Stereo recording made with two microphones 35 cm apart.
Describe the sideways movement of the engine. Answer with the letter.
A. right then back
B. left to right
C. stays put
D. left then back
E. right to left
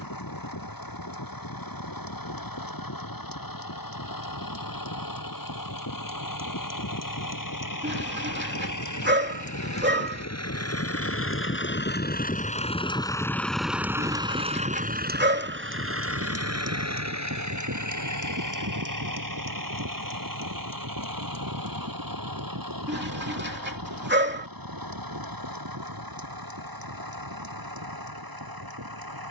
B.